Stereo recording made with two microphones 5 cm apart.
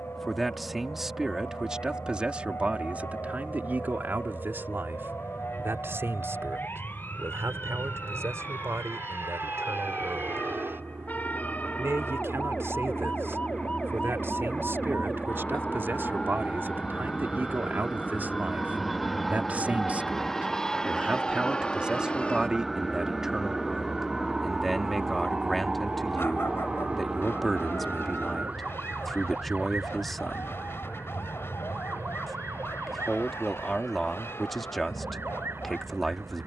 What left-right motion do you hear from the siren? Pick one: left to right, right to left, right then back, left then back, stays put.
left to right.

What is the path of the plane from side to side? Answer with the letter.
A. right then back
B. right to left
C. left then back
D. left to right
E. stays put
B.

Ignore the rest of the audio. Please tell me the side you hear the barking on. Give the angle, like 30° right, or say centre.
60° left.